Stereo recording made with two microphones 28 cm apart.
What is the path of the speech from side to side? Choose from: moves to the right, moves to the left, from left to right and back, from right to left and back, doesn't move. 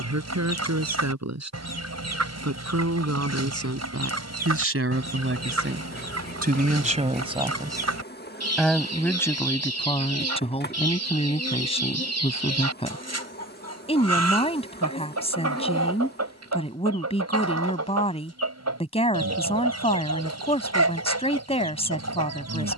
moves to the left.